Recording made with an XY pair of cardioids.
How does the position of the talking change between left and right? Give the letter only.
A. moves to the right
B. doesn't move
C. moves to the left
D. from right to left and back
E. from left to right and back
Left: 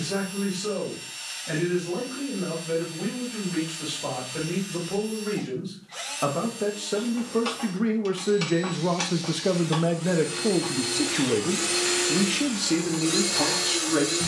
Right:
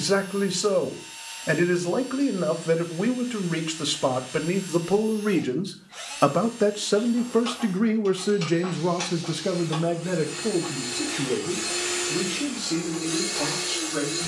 C.